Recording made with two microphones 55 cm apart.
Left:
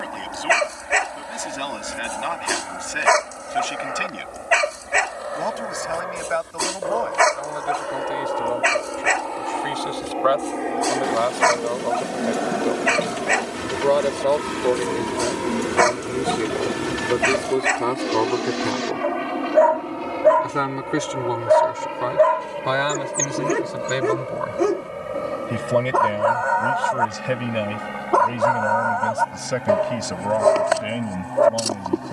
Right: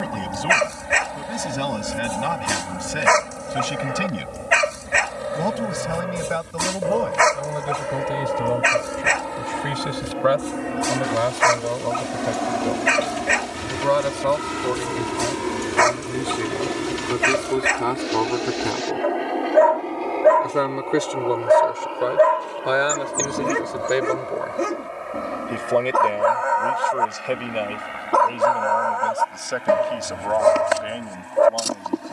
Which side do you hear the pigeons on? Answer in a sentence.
In this clip you hear the pigeons on the left.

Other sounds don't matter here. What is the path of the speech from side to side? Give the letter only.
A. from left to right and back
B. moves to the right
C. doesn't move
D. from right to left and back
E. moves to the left
E.